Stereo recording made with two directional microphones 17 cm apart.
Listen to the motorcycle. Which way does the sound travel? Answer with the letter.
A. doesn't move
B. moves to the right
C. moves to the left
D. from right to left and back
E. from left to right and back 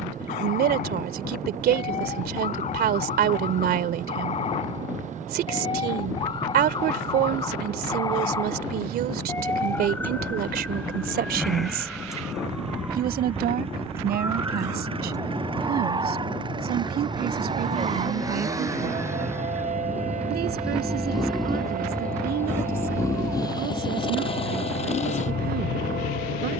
C.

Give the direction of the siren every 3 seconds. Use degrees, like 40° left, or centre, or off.
40° left, 40° left, 20° left, 10° left, 10° right, 30° right, 40° right, 50° right, 60° right.